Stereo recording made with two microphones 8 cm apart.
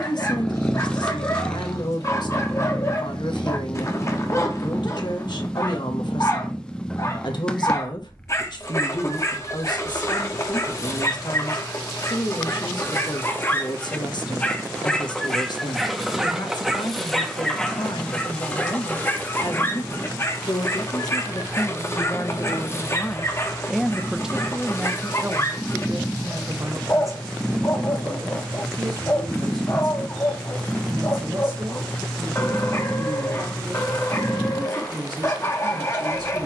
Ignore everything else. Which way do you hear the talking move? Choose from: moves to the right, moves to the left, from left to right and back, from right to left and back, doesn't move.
moves to the right.